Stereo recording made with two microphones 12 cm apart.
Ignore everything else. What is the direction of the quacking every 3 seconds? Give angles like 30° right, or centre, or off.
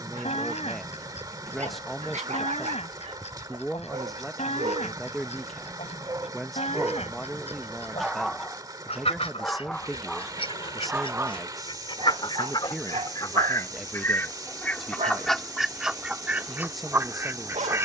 70° left, 70° left, 70° left, 50° left, 30° left, 10° right.